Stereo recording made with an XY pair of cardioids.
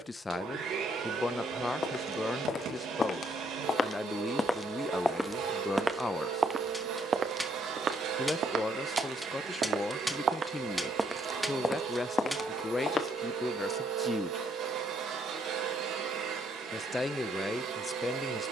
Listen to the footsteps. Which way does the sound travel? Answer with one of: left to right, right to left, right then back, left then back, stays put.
right then back.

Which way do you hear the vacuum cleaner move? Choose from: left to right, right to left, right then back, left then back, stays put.
stays put.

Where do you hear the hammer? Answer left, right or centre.
centre.